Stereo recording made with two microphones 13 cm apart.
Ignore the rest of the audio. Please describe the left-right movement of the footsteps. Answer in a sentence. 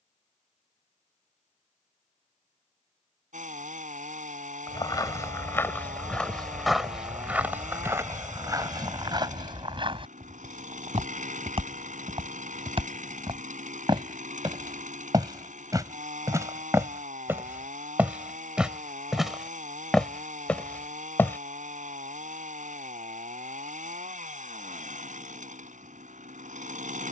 In this clip you hear the footsteps move from left to right and back again.